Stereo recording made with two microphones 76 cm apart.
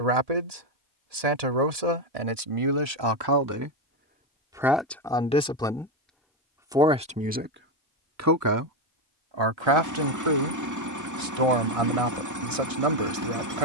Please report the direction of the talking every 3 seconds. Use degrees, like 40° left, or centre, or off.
50° right, 10° right, 20° right, 40° right, 50° right.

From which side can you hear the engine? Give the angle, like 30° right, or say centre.
20° right.